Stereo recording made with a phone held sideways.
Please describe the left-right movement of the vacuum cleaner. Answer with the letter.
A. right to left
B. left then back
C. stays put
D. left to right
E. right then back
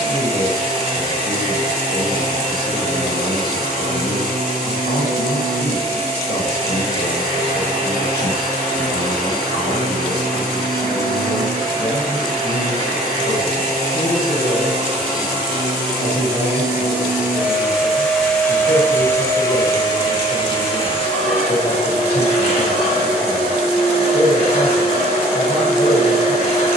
A.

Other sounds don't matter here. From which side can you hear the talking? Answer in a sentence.
In this clip you hear the talking on the left.